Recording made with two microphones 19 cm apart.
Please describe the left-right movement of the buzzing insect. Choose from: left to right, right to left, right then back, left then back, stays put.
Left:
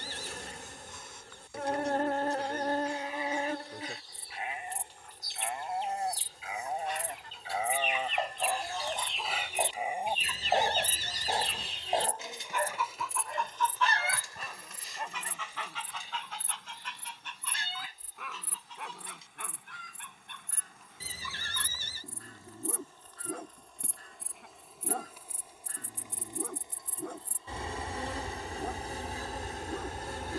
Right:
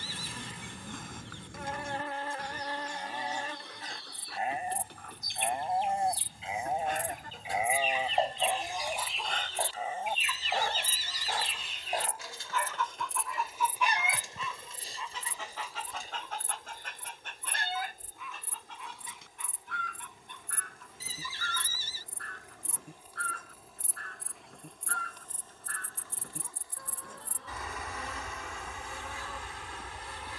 right then back.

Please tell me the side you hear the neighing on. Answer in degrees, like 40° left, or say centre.
60° left.